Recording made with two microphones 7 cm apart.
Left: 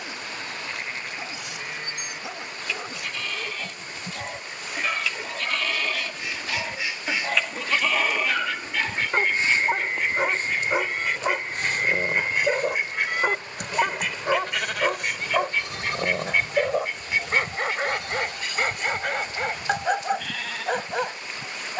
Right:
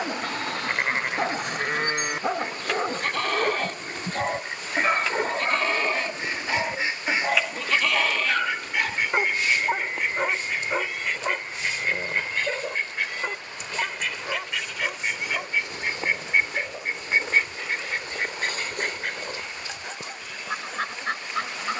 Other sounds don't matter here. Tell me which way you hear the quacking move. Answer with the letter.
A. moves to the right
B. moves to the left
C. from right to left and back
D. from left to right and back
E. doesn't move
C.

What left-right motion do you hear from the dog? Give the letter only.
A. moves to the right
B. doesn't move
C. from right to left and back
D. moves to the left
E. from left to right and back
D.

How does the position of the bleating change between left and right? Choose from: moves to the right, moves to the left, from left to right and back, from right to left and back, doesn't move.
moves to the left.